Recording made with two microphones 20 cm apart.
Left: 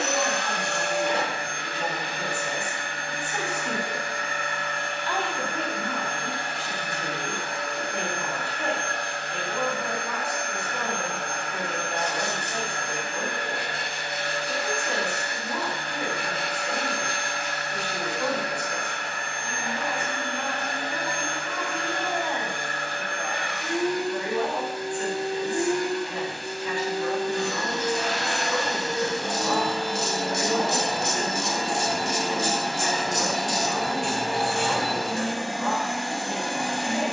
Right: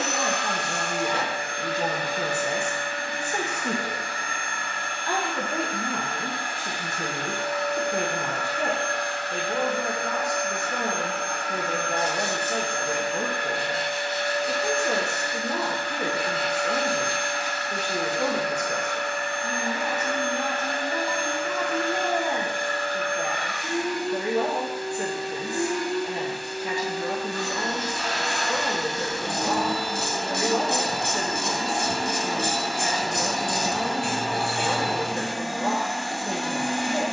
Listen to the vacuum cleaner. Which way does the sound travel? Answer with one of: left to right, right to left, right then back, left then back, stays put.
stays put.